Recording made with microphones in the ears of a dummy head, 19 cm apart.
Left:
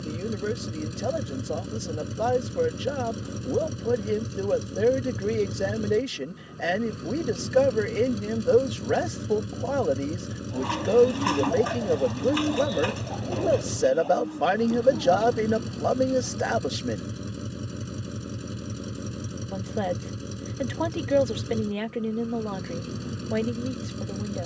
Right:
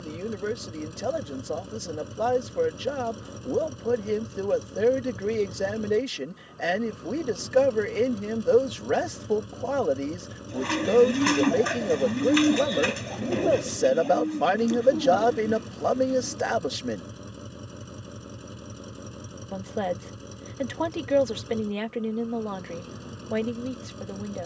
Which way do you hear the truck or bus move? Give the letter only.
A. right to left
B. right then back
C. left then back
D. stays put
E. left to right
D.